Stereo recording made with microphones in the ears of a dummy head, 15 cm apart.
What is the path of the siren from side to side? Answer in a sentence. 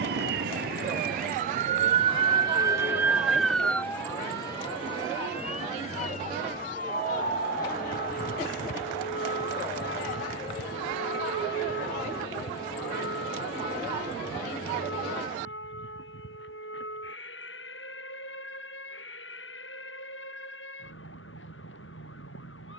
In this clip you hear the siren move from right to left.